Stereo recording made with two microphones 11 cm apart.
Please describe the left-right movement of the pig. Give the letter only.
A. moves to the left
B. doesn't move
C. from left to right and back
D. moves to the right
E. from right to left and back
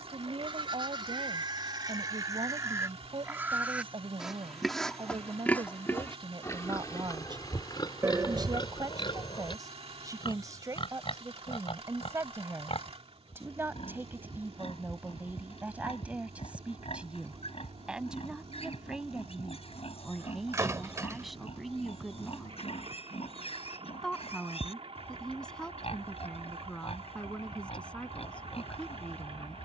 A.